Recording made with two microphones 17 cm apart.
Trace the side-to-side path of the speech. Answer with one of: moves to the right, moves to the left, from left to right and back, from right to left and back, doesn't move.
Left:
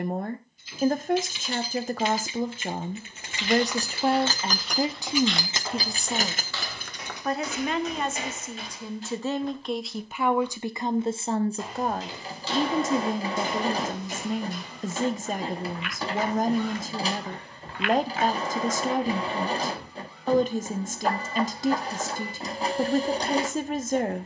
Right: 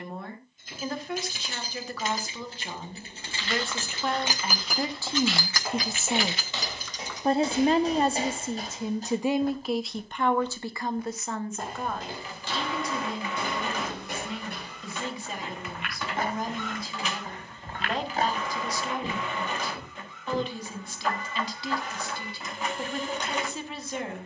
from left to right and back.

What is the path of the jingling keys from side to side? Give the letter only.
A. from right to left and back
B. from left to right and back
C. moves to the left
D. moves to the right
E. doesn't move
C.